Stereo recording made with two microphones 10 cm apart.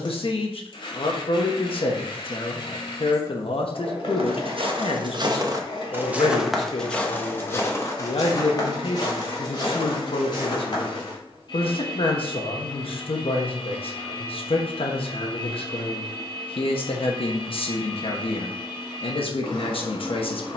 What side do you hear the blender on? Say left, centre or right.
left.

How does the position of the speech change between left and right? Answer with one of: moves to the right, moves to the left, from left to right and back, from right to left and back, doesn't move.
doesn't move.